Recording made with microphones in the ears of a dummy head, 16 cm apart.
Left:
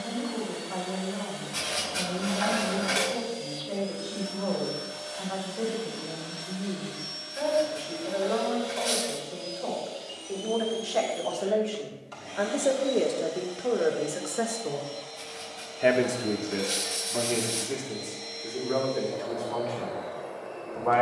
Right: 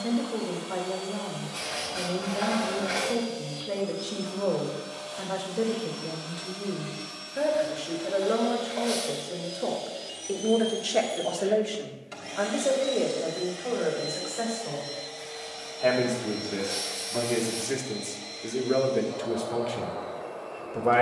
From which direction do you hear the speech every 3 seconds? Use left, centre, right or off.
right, right, right, right, left, centre, right.